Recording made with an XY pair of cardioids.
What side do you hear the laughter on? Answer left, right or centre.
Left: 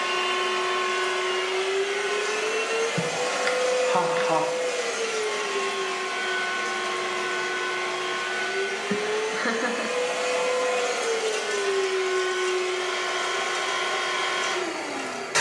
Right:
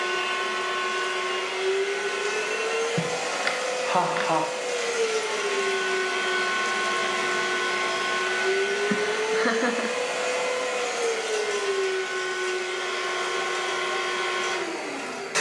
centre.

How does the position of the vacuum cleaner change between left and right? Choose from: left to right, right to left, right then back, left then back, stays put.
right then back.